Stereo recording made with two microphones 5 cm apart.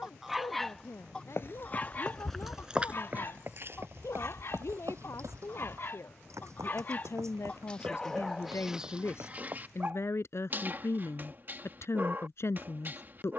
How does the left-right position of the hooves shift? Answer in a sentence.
You can hear the hooves move to the right.